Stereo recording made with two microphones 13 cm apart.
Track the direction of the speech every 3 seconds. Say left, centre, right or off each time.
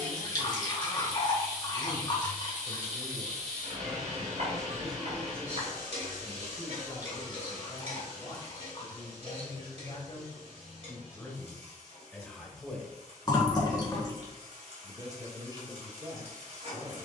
right, centre, left, left, centre, right.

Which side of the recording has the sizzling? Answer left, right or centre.
right.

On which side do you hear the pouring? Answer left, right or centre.
left.